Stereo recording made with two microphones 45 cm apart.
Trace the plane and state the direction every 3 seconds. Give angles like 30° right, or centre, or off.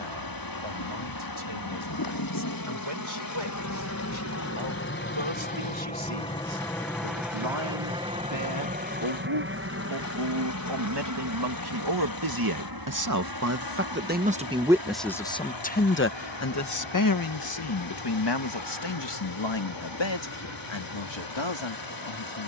50° left, 30° left, centre, 30° right, 50° right, 60° right, 60° right, 60° right.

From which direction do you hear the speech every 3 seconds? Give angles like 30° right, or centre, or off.
80° right, 80° right, 70° right, 60° right, 30° right, 30° left, 60° left, 70° left.